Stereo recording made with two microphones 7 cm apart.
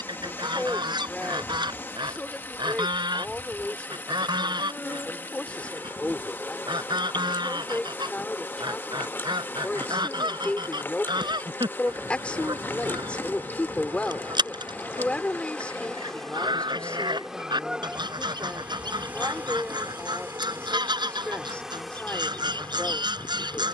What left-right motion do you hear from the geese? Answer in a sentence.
In this clip you hear the geese stay in one place.